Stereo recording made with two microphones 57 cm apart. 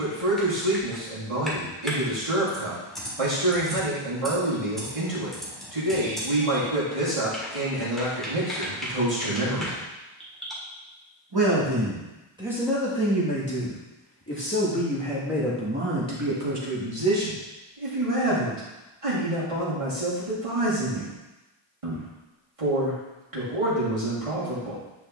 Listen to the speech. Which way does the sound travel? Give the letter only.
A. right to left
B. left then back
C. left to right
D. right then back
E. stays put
B.